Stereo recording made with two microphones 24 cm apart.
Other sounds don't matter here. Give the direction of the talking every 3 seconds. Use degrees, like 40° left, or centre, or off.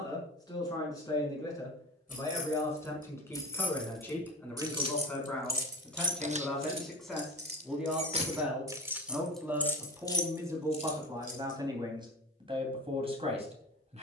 10° left, 10° left, centre, 10° right, 20° right.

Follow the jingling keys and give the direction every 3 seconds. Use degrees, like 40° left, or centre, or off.
30° left, 10° right, 30° right, 20° left, off.